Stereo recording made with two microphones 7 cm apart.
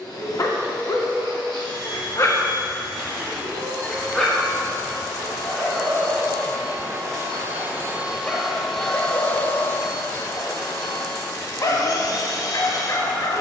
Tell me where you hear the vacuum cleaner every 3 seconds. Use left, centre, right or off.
right, right, right, left, left.